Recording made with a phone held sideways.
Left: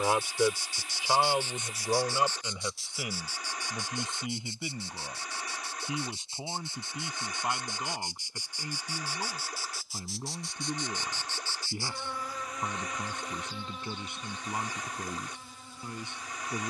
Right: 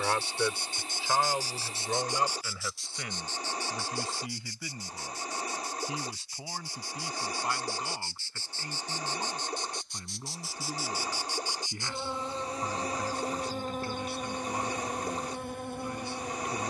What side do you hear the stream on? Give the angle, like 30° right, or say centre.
40° right.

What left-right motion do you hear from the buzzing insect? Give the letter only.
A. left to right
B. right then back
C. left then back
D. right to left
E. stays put
C.